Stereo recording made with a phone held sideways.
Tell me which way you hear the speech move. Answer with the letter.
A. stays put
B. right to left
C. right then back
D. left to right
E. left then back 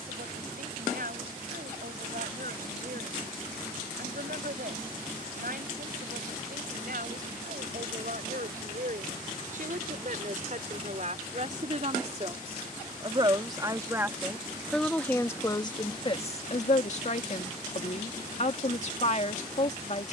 B.